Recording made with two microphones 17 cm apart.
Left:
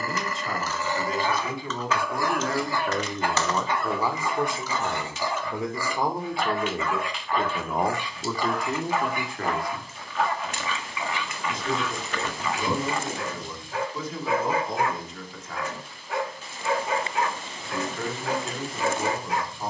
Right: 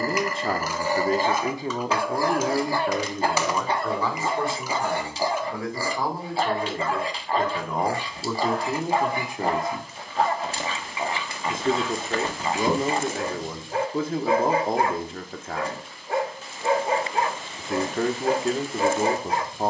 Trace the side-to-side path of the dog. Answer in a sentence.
You can hear the dog stay in one place.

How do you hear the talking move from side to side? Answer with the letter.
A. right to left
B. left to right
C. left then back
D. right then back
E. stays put
C.